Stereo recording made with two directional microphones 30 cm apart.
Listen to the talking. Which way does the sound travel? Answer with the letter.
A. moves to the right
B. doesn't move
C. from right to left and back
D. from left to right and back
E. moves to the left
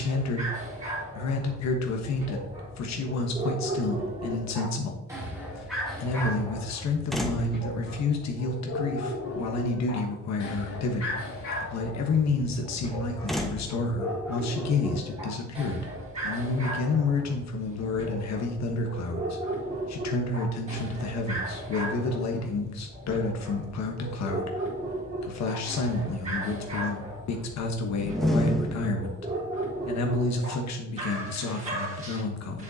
B.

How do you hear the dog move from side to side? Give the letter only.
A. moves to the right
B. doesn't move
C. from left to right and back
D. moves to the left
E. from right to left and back
E.